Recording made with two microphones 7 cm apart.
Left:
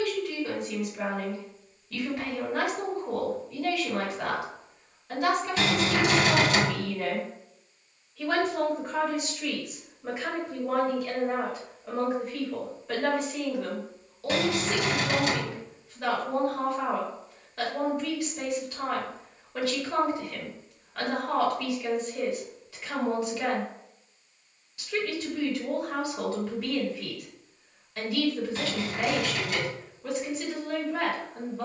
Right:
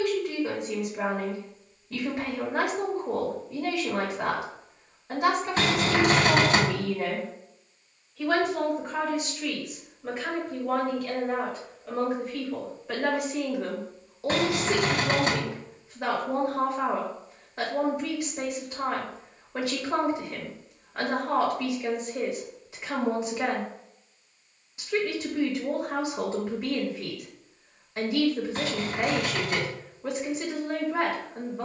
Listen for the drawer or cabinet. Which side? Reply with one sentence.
You can hear the drawer or cabinet on the right.